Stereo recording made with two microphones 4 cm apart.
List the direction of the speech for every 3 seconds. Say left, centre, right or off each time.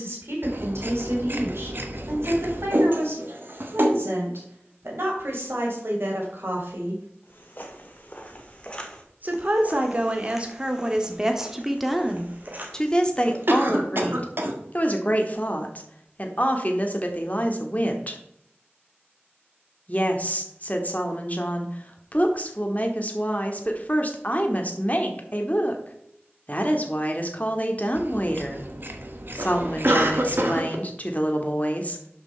right, right, right, right, left, left, left, left, left, left, left.